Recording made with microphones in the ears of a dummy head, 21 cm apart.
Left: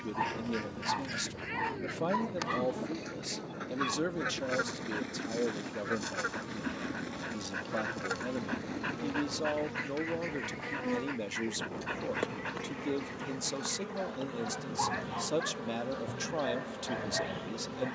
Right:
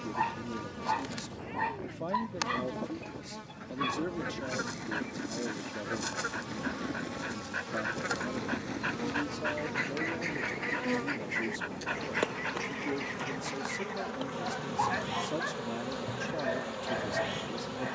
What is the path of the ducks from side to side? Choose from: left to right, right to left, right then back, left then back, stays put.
left to right.